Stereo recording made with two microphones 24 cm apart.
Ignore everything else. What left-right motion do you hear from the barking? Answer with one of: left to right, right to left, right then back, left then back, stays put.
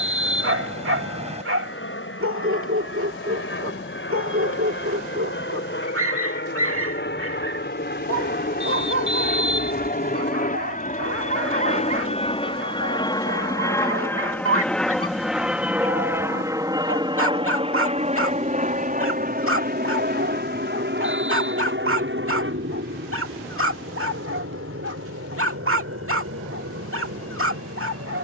stays put.